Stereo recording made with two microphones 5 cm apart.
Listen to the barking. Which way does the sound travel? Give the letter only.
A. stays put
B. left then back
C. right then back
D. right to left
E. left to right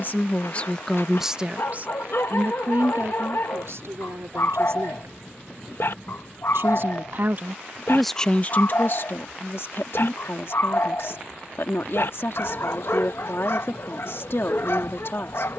A.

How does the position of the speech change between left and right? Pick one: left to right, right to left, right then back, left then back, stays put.
right then back.